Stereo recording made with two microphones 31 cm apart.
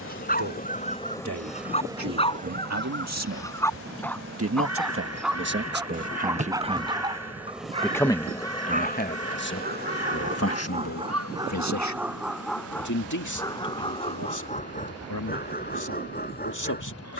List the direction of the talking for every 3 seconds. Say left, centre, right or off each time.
right, right, centre, left, left, left.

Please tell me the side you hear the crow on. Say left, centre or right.
right.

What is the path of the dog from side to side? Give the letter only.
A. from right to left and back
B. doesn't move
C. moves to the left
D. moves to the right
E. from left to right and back
E.